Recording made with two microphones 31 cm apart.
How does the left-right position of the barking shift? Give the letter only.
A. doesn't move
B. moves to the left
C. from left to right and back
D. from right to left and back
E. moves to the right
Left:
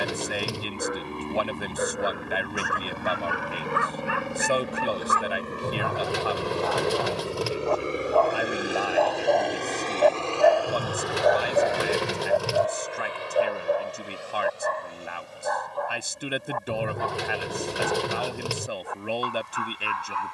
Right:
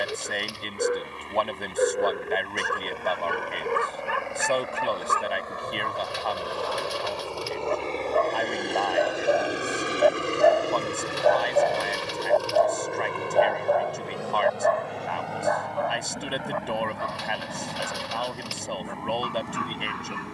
B.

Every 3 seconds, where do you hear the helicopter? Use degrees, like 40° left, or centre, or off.
60° left, 50° left, 20° left, 20° right, 50° right, 70° right, 80° right.